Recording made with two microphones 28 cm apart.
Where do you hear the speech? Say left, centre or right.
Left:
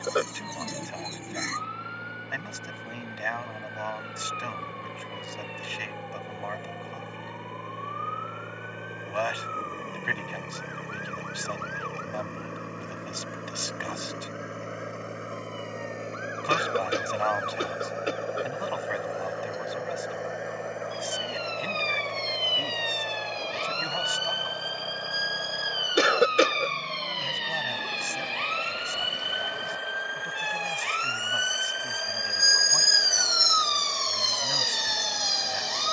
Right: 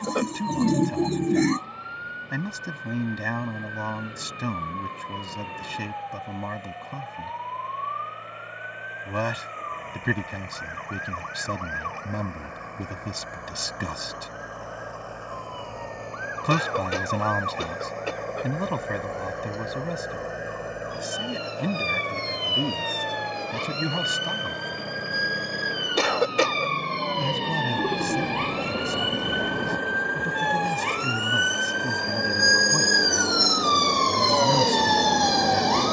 right.